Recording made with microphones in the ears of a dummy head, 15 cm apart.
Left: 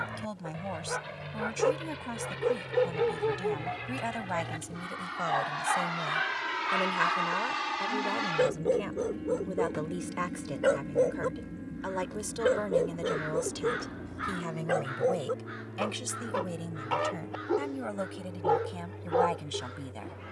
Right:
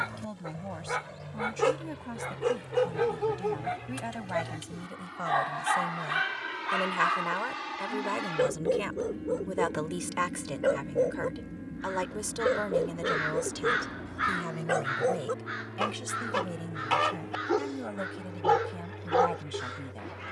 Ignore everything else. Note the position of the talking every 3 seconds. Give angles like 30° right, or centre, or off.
30° left, 20° left, 30° right, 30° right, 10° right, 20° left, 30° left.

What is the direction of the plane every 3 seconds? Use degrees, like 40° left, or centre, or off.
60° left, 50° left, 30° left, centre, 20° right, 40° right, 50° right.